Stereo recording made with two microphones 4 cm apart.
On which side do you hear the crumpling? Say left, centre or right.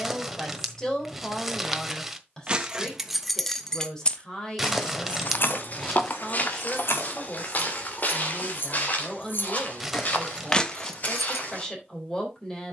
centre.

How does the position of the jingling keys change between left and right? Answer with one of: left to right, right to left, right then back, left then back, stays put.
left then back.